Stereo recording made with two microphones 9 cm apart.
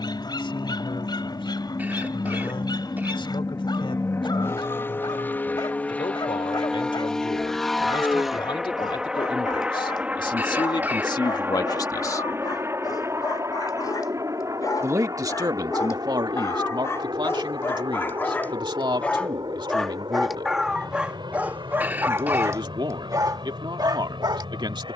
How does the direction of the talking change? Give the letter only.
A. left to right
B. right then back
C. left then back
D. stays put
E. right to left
A.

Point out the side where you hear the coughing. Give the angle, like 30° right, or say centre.
20° right.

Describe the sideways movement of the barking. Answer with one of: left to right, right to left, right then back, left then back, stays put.
left to right.